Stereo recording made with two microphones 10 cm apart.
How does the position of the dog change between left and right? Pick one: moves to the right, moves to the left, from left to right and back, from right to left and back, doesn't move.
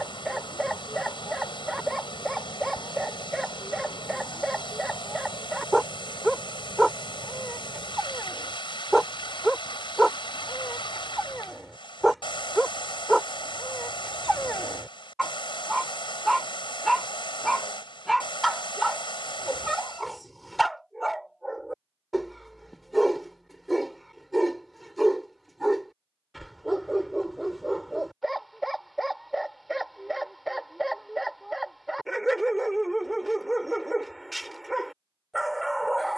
doesn't move.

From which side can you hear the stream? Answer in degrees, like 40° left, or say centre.
60° left.